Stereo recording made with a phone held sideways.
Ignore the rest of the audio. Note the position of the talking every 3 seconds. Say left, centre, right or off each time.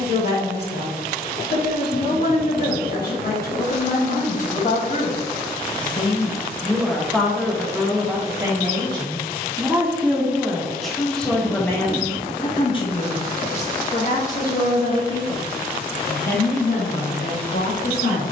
left, left, centre, centre, left, left.